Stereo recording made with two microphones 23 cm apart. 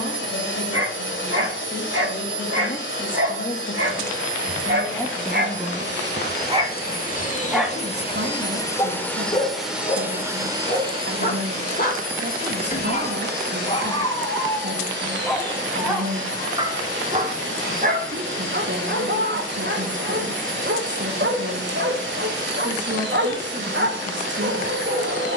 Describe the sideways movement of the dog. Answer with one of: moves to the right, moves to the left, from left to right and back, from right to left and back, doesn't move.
from right to left and back.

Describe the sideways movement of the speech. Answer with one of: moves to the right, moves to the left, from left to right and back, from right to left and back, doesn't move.
moves to the right.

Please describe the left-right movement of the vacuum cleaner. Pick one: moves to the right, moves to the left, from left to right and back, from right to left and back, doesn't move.
moves to the right.